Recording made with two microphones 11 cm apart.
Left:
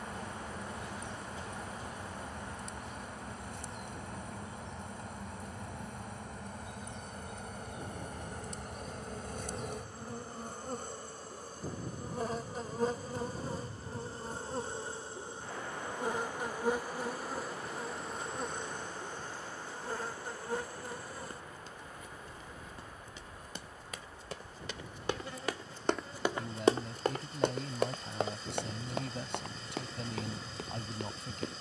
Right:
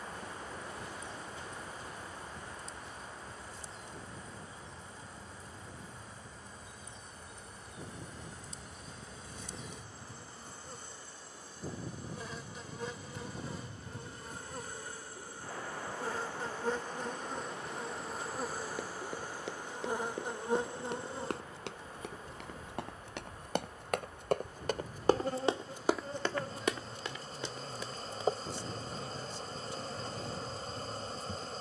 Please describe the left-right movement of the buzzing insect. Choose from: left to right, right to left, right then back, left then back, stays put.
left to right.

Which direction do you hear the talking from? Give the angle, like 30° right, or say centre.
70° left.